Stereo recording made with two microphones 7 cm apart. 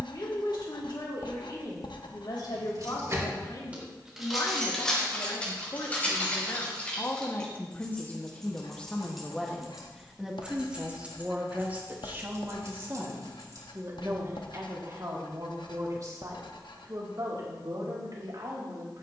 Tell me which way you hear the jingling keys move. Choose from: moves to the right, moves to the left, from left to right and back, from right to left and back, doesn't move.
from right to left and back.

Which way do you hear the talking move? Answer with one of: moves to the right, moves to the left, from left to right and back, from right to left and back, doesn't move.
moves to the right.